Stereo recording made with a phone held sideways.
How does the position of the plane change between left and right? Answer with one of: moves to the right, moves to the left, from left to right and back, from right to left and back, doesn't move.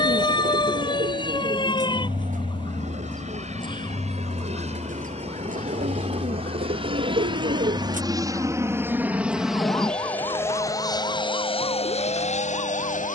moves to the left.